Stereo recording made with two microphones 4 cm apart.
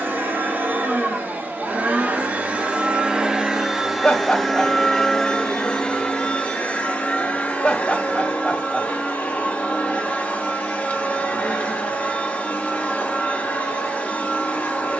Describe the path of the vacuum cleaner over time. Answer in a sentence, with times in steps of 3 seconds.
You can hear the vacuum cleaner on the right from 0 s, in the centre from 3 s and on the left from 6 s.